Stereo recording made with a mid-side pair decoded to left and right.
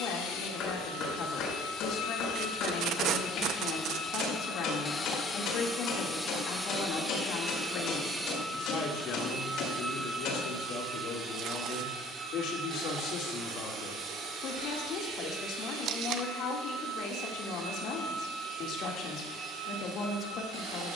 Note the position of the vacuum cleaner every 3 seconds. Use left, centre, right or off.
left, left, centre, right, right, right, right.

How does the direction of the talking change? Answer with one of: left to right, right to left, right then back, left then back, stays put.
stays put.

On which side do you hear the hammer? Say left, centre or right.
left.